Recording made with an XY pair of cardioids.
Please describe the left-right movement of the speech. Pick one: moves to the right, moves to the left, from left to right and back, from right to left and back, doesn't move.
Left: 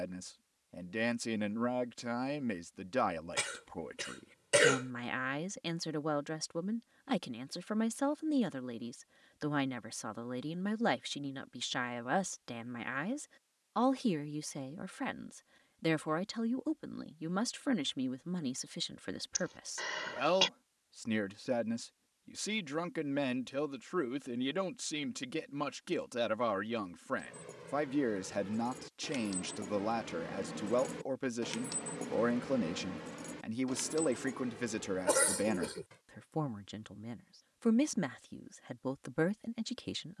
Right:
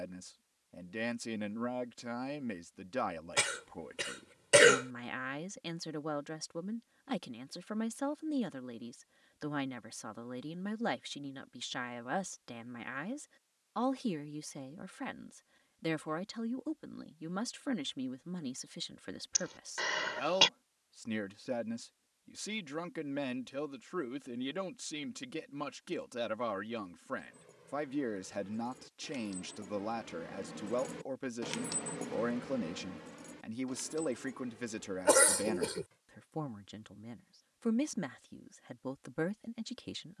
doesn't move.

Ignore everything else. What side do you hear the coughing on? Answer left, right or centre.
right.